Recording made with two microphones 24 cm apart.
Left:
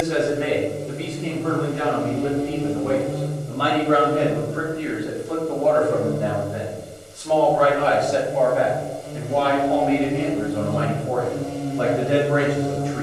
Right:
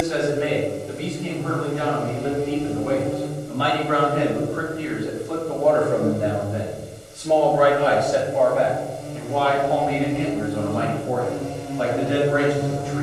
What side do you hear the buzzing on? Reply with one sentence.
You can hear the buzzing on the left.